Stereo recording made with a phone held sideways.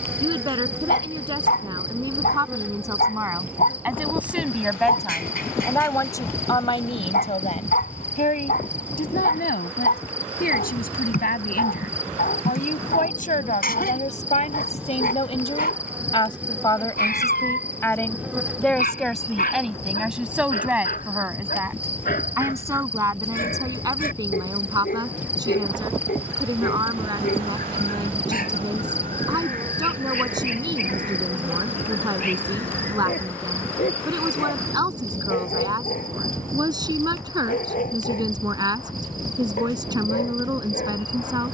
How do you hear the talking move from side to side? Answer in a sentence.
In this clip you hear the talking move from right to left and back again.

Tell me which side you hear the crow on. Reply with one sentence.
In this clip you hear the crow on the right.